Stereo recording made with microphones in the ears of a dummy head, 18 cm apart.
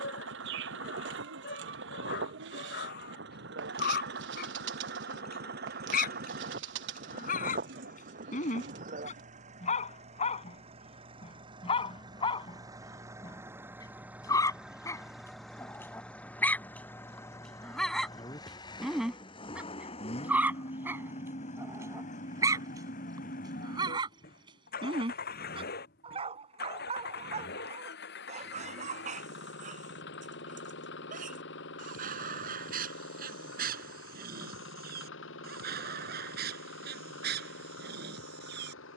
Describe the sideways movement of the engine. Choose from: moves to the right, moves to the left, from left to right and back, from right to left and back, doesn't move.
moves to the left.